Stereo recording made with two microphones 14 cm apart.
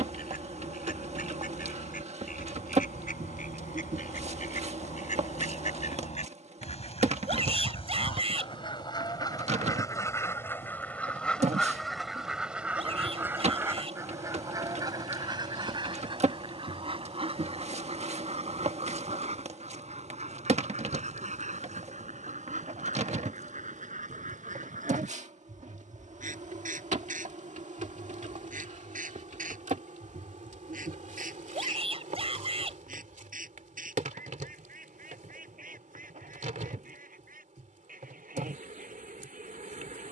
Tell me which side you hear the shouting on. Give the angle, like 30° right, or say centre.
40° right.